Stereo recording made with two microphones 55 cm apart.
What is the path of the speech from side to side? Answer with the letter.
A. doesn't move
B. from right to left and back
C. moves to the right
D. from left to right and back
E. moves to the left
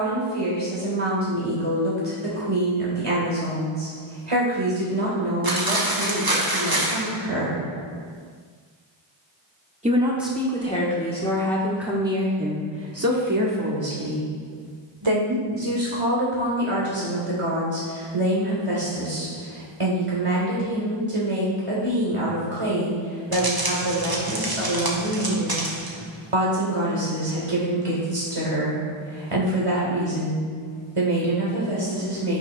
B.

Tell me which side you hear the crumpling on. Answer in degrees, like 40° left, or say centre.
40° right.